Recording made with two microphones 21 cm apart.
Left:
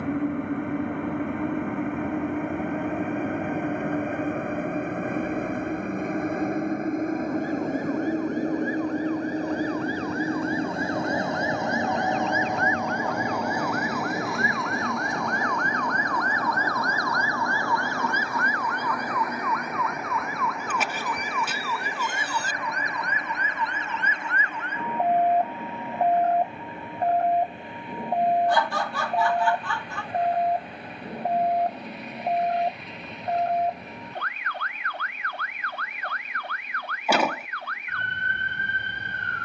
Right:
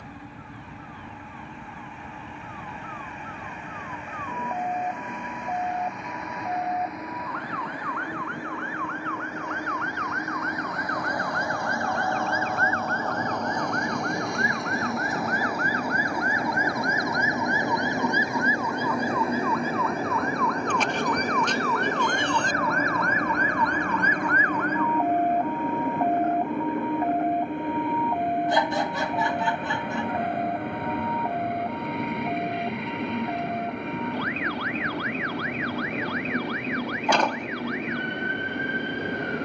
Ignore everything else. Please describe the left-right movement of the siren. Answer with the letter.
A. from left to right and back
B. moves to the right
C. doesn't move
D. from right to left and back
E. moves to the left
E.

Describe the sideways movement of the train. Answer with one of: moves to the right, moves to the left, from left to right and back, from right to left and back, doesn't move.
moves to the right.